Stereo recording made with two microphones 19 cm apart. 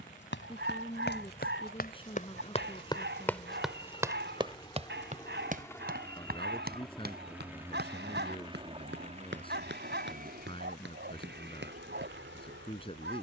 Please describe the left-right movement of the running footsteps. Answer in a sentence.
You can hear the running footsteps travel towards the right.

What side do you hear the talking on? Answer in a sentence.
You can hear the talking on the left.